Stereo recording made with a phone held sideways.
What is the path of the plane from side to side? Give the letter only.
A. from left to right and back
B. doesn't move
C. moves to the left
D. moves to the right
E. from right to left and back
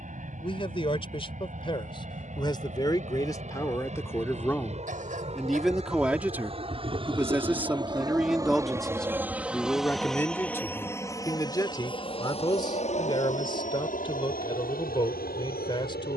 C.